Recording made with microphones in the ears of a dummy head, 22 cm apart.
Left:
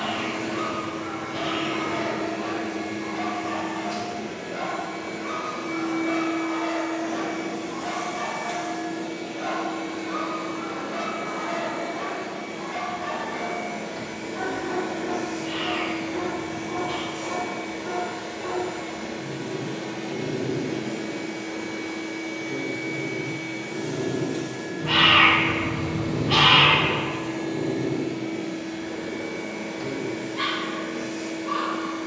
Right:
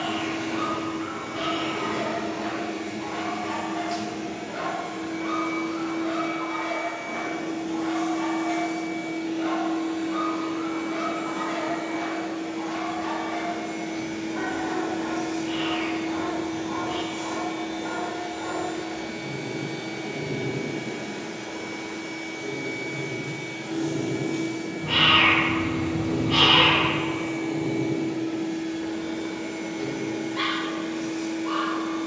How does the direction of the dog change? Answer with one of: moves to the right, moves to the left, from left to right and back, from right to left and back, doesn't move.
from right to left and back.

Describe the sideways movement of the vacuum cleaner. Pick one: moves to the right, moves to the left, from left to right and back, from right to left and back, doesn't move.
from right to left and back.